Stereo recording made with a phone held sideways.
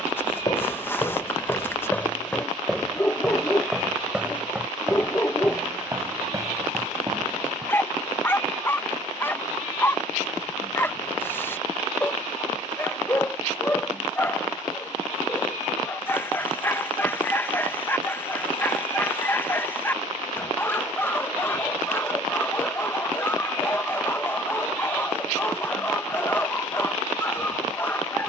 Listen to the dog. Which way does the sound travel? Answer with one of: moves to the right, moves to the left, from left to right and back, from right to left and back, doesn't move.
doesn't move.